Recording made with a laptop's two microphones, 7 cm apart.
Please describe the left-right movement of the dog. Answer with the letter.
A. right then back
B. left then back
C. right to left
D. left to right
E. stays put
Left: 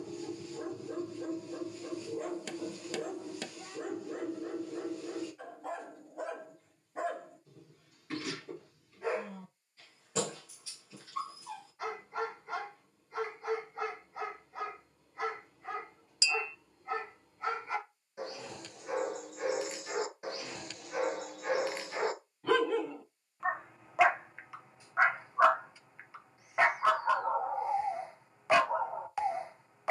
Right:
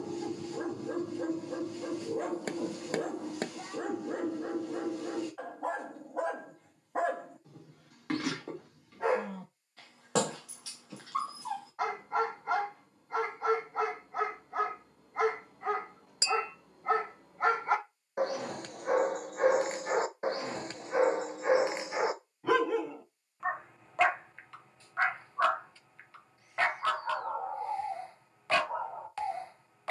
C.